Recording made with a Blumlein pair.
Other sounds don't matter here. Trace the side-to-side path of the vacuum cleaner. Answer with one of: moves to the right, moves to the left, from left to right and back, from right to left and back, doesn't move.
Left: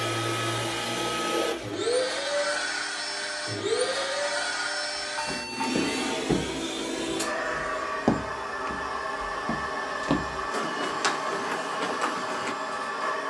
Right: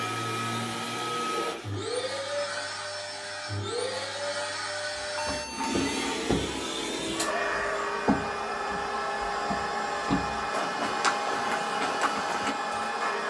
moves to the right.